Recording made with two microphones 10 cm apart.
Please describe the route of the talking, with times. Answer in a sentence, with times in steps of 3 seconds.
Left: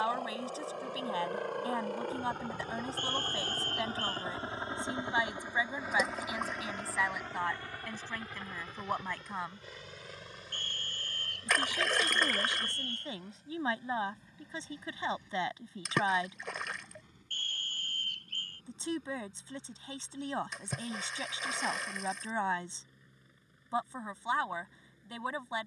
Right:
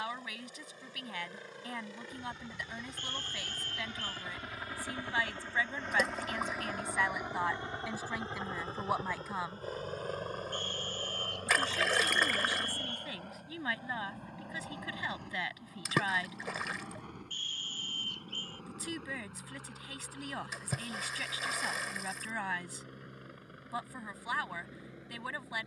You can hear the talking on the left from 0 s, in the centre from 6 s and on the left from 12 s.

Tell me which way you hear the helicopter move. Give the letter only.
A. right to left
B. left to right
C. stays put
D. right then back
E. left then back
B.